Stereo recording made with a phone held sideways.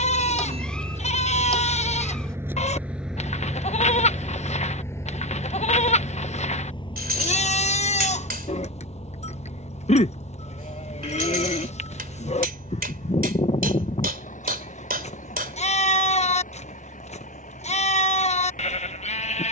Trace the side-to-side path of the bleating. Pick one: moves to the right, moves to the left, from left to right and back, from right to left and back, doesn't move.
doesn't move.